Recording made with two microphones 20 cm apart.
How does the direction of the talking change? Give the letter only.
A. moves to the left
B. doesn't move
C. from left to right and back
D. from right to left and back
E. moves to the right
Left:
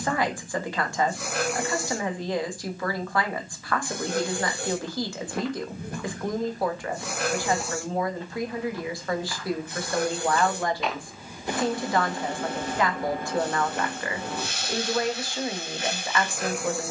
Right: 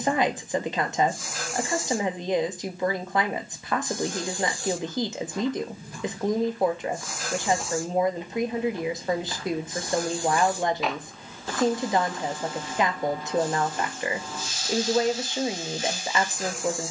B.